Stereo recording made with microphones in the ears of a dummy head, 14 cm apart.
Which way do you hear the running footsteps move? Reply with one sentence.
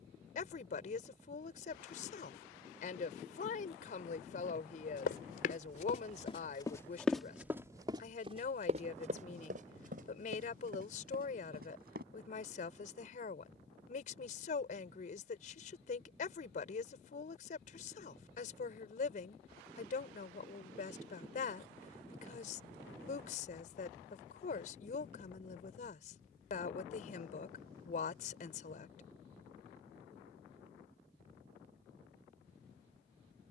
You can hear the running footsteps move to the right.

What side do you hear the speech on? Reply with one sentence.
In this clip you hear the speech on the left.